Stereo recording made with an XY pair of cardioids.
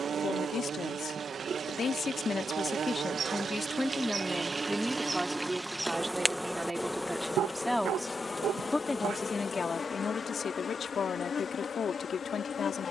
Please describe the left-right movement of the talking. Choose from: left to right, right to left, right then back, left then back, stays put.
right then back.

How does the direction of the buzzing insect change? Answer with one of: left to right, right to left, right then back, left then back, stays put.
right to left.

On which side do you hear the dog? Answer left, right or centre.
right.